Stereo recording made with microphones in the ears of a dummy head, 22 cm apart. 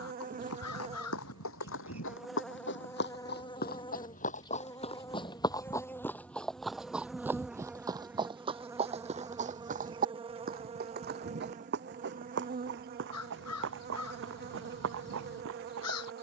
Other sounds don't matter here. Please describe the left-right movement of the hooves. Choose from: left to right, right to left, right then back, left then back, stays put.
left to right.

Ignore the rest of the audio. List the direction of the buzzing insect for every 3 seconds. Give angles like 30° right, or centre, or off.
10° right, 20° left, centre, 20° right, 40° right, 40° right.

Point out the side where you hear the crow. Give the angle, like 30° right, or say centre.
70° left.